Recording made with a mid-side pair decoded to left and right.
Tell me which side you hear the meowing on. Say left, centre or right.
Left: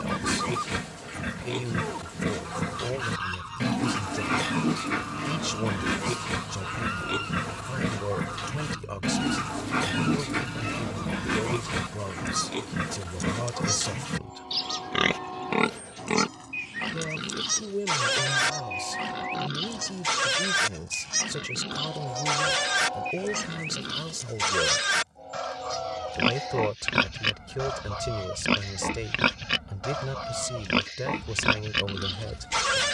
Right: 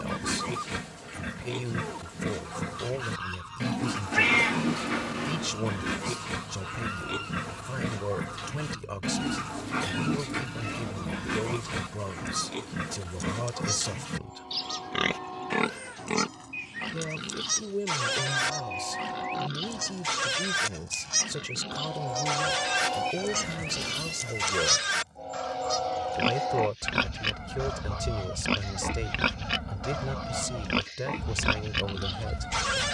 right.